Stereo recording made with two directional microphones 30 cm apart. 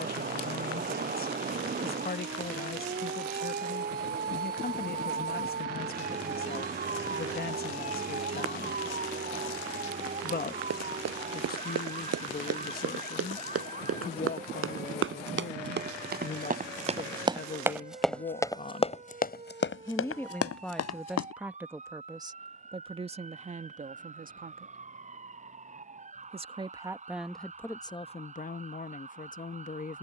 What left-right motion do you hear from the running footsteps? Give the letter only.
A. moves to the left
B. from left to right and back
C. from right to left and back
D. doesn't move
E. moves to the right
A.